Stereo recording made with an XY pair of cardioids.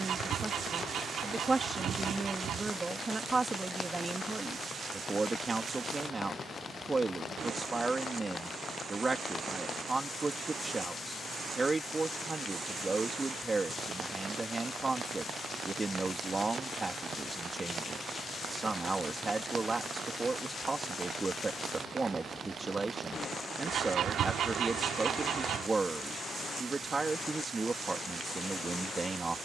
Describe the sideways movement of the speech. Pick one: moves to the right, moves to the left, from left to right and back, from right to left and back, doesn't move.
doesn't move.